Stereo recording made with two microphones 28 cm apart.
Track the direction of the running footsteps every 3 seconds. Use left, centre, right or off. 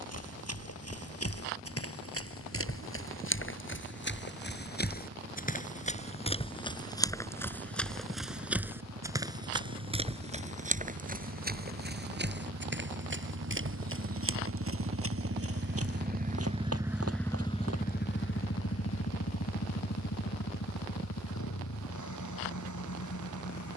left, left, centre, right, right, right, off, off.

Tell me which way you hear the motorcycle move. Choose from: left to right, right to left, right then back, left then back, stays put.
right to left.